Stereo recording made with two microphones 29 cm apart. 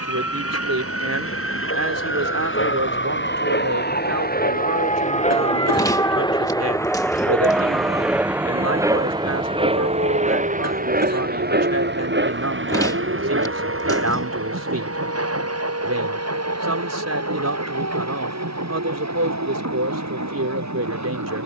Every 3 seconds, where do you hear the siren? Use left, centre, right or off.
left, left, centre, right, right, right, right.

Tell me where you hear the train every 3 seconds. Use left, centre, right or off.
left, left, centre, right, right, right, right.